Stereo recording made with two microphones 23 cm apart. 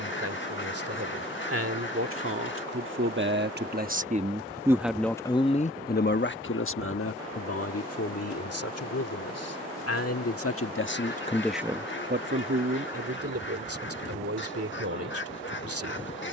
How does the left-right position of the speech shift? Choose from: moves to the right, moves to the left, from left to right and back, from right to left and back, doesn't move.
from right to left and back.